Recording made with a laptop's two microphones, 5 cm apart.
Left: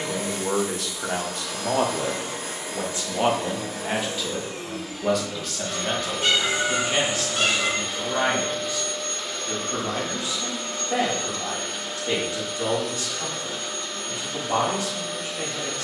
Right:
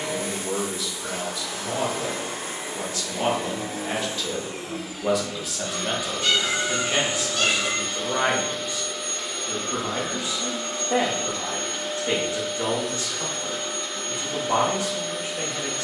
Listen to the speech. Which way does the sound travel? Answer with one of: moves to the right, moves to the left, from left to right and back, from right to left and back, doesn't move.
moves to the right.